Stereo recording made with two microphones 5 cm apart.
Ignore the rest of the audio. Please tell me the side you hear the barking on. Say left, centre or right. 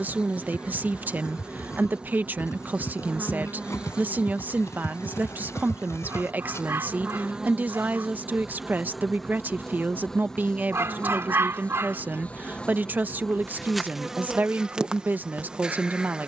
right.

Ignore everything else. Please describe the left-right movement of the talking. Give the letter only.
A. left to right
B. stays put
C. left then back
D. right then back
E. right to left
B.